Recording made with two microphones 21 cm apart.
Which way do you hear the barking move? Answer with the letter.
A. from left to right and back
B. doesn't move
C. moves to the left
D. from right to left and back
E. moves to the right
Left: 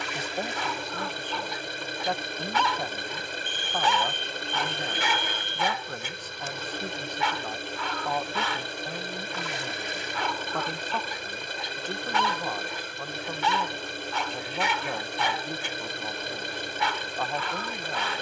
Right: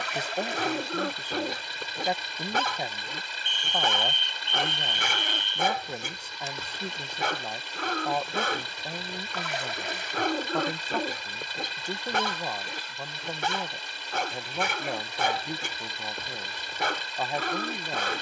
B.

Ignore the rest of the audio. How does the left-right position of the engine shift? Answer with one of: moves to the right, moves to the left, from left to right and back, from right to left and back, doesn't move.
doesn't move.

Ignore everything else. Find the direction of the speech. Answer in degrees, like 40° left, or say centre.
10° right.